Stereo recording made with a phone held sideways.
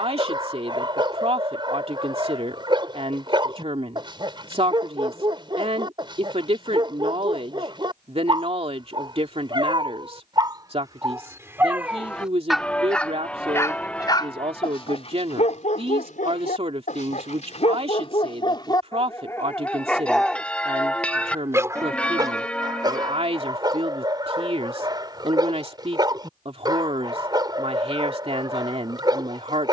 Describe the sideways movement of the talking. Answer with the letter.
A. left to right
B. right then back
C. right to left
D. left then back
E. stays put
E.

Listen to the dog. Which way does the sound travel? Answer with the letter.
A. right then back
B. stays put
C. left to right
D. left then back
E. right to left
D.